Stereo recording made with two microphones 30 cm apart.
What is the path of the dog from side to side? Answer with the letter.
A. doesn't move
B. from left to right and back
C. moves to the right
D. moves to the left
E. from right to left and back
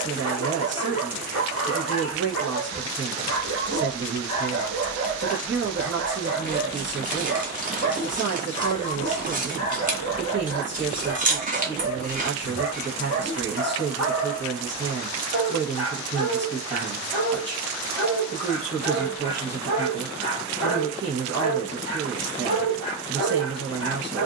A.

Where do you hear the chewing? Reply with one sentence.
You can hear the chewing on the right.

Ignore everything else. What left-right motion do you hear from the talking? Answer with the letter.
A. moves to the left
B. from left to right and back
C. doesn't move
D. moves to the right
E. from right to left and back
C.